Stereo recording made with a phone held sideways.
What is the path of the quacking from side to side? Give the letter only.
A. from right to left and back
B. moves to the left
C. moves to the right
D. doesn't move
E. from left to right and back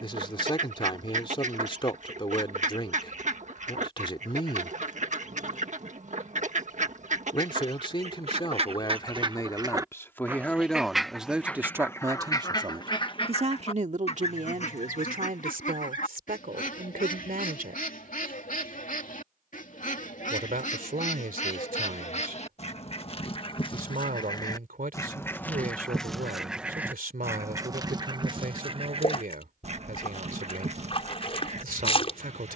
A.